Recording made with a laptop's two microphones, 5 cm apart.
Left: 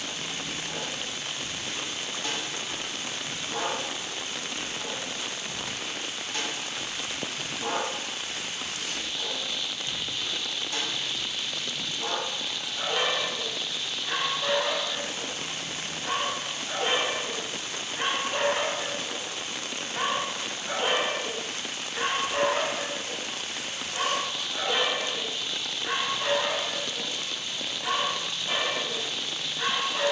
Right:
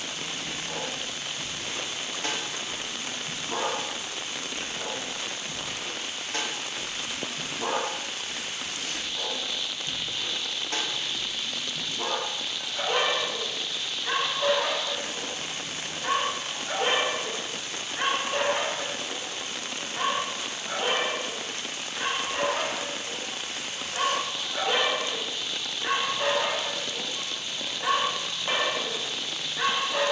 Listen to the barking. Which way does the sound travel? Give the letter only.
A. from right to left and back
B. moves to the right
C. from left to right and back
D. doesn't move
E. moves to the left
A.